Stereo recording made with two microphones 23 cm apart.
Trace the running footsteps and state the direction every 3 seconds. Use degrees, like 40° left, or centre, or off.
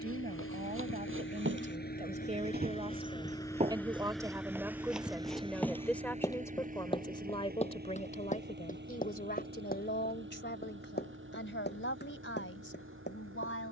60° right, 10° right, 30° left, 40° left, 50° left.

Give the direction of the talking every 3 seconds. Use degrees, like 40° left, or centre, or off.
30° right, 10° right, 20° left, 50° left, 60° left.